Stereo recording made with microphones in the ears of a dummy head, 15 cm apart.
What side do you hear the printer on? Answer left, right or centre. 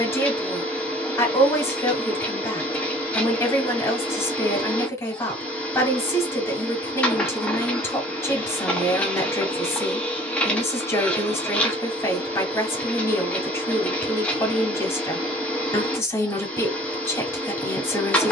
centre.